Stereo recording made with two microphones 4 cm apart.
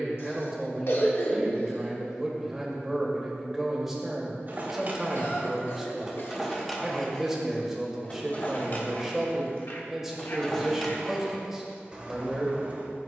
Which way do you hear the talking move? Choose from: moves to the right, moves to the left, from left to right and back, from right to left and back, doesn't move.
doesn't move.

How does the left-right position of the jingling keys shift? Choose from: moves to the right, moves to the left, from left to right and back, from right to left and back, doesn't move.
from right to left and back.